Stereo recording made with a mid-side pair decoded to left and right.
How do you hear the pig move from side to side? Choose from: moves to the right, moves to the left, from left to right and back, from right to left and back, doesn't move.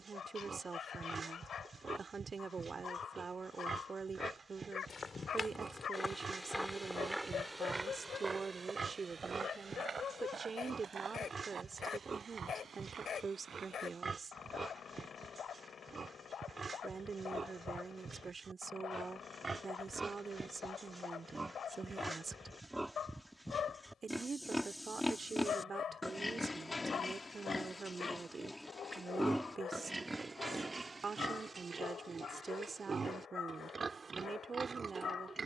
from right to left and back.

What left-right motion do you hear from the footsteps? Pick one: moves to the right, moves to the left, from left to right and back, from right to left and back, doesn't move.
moves to the right.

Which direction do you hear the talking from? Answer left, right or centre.
right.